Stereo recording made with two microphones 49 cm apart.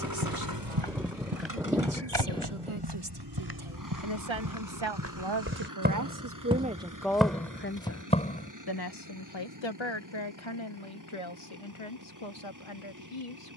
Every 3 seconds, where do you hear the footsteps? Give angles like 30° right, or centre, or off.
50° right, 40° right, centre, off, off.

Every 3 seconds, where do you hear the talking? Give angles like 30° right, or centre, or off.
80° right, 60° right, 10° left, 60° left, 70° left.